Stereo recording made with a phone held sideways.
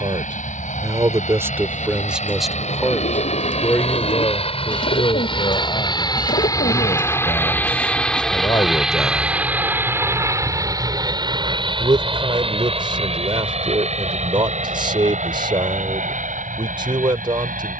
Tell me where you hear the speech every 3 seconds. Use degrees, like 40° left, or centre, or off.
10° right, 30° left, 40° left, centre, 30° right, 30° right.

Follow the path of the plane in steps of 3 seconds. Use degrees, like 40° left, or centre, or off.
60° left, 40° left, 10° left, 20° right, 40° right, 50° right.